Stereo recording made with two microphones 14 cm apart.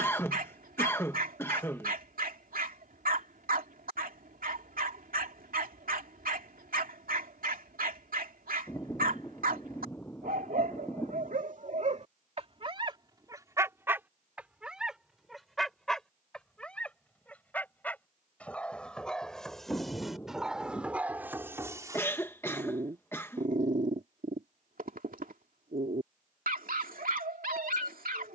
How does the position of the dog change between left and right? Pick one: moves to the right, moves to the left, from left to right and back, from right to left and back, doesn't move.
from right to left and back.